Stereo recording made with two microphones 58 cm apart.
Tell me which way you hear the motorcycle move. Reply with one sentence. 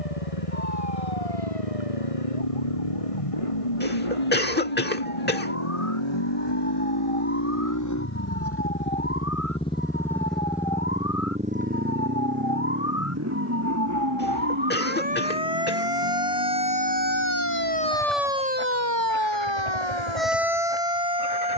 In this clip you hear the motorcycle travel towards the right.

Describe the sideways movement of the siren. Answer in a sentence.
You can hear the siren move from left to right.